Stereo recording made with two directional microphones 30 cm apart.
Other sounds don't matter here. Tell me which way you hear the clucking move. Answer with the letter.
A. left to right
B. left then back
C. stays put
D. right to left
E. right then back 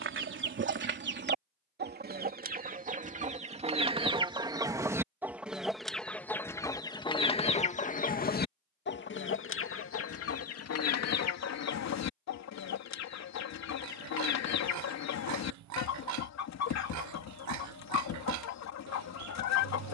D.